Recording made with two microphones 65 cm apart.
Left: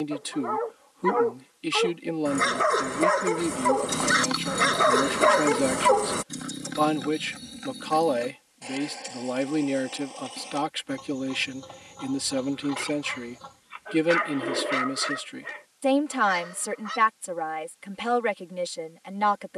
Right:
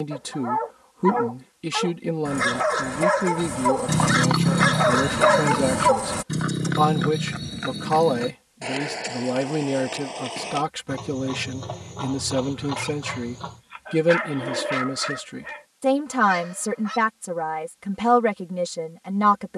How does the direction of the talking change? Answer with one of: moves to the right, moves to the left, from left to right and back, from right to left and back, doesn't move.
doesn't move.